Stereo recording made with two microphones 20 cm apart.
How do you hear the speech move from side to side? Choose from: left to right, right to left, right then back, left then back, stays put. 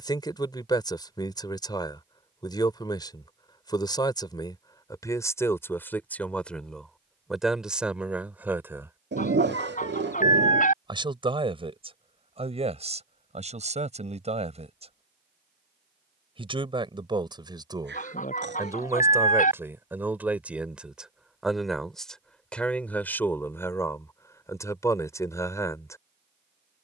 right then back.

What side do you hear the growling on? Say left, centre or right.
right.